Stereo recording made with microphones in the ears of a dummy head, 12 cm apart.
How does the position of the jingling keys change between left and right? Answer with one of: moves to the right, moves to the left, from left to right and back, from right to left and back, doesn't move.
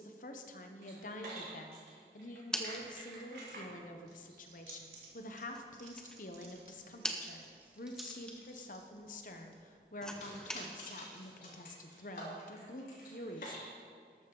moves to the left.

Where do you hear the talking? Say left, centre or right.
left.